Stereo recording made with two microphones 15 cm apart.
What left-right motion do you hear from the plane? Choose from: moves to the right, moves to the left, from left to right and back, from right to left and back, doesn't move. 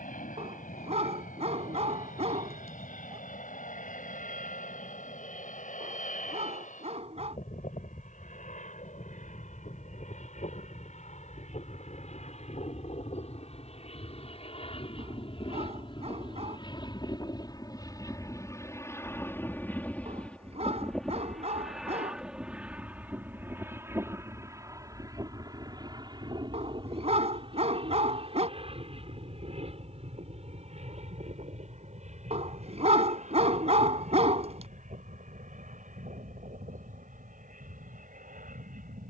moves to the right.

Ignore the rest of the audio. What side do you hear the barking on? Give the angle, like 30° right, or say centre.
50° right.